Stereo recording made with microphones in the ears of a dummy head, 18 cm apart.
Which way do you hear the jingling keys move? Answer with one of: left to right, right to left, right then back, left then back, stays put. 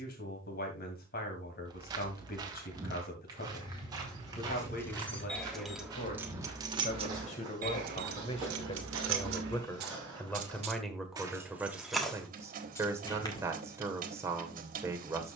right then back.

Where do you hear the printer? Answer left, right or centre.
right.